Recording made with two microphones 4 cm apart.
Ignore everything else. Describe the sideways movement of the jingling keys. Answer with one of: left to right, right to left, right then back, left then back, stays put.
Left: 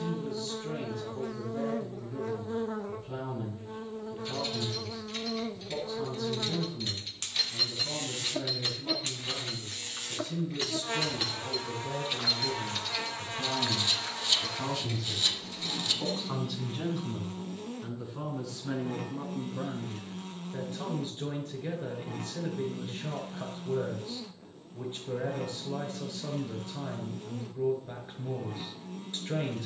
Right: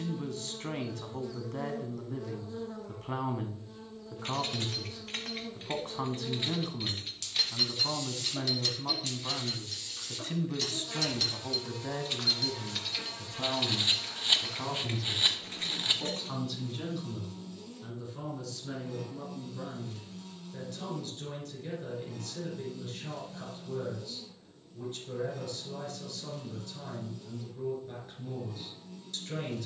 left then back.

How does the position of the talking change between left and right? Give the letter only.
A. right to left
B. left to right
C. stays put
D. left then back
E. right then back
A.